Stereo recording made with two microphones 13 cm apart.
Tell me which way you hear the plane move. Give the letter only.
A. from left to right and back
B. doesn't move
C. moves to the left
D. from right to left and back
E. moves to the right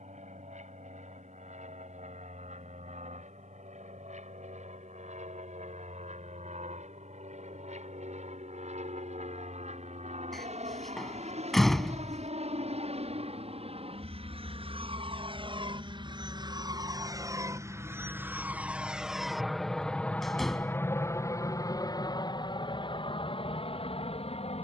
C.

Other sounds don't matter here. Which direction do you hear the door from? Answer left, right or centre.
centre.